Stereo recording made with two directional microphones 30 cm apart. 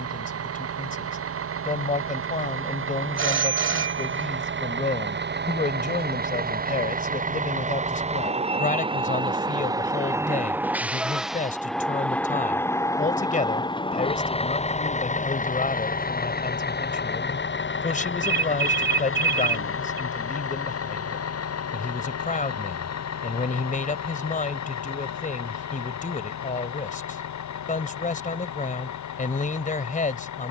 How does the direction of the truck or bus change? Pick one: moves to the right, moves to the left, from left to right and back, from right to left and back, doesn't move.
moves to the left.